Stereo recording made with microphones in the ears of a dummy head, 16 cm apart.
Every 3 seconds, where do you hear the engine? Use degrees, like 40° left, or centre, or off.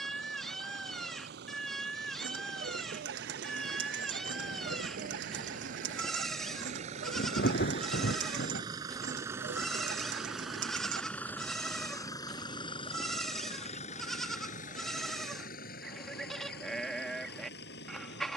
60° right, 50° right, 30° right, centre, 30° left, 50° left.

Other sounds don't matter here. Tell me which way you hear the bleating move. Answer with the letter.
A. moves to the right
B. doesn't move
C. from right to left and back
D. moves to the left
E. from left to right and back
B.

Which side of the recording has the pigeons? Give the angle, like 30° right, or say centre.
70° right.